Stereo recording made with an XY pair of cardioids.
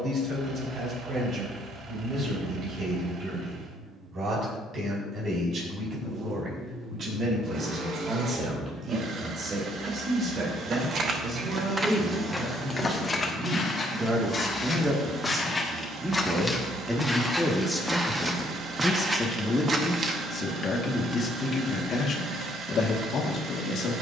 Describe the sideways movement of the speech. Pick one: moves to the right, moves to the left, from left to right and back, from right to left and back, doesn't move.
moves to the left.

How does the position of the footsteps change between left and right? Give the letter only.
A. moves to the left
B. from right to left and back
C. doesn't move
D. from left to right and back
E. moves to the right
B.